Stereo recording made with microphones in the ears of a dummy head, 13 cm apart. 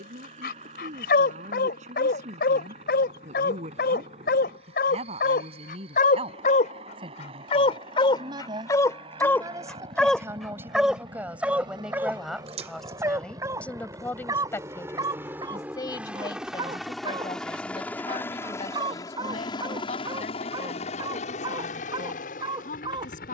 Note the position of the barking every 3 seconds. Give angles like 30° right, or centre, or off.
80° left, 80° left, 40° left, centre, 20° right, 30° right, 30° right, 30° right.